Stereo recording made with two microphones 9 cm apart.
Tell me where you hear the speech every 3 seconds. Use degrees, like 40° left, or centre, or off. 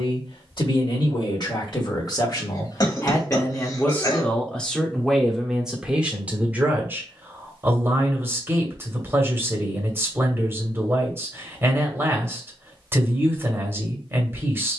50° left, 10° left, 20° right, 30° right, 30° right.